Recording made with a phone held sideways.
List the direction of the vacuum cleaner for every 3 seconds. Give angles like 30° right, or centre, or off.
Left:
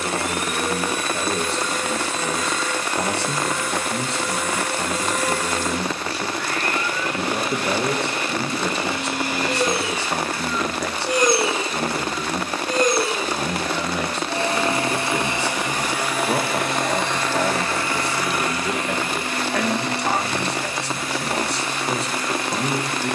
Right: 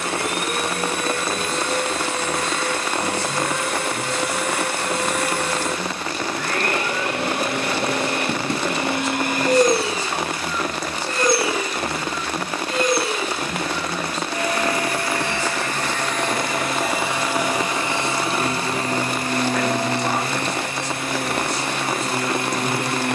60° right, 60° right, 60° right, 10° right, 30° left, centre, 40° right, 50° right.